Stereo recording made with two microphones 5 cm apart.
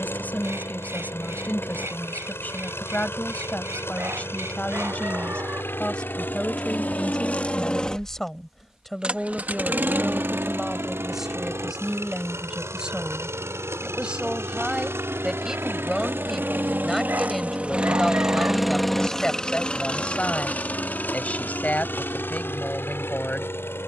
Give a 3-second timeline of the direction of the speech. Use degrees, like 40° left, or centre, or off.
40° left, 30° left, 10° left, centre, 20° right, centre, 20° left, 30° left.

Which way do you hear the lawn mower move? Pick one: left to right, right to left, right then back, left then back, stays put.
right then back.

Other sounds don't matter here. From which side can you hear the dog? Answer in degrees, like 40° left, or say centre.
50° right.